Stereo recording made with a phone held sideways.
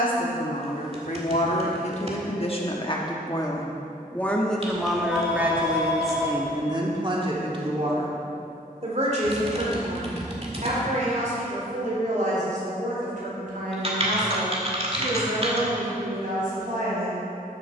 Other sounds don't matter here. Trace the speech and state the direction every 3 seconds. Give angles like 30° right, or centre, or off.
50° left, centre, 30° right, 50° right, 60° right, 60° right.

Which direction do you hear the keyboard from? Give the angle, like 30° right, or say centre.
40° right.